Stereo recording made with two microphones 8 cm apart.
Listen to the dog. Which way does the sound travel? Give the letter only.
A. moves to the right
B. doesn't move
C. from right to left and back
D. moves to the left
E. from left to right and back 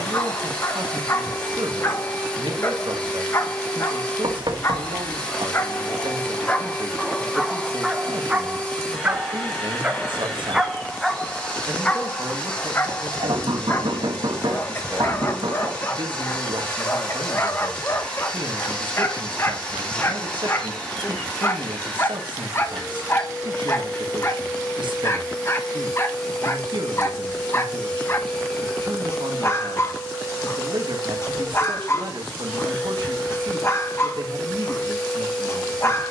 E.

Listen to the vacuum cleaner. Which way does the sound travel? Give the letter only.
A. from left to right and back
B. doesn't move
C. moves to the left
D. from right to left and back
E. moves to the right
B.